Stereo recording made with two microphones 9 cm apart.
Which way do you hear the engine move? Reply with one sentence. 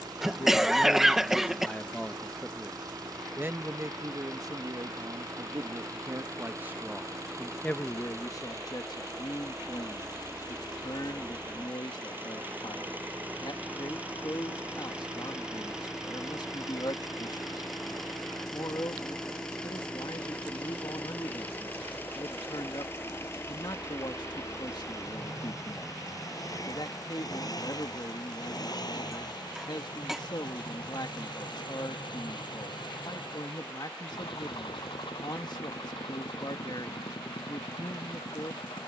You can hear the engine move to the left.